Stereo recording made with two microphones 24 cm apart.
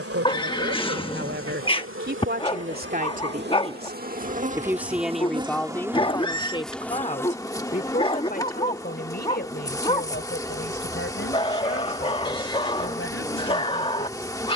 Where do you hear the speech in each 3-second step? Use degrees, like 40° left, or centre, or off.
50° right, 10° right, 30° left, 50° left, 60° left.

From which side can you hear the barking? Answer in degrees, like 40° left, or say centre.
20° left.